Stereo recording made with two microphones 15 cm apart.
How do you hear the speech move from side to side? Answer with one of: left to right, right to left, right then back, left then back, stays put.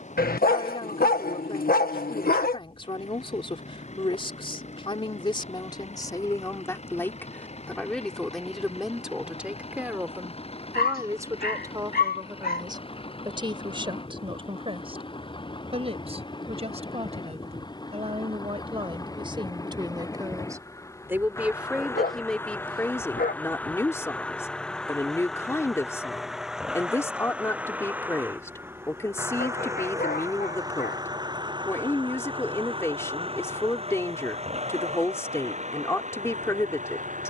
right then back.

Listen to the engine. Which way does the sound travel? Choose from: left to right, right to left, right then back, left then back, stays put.
left to right.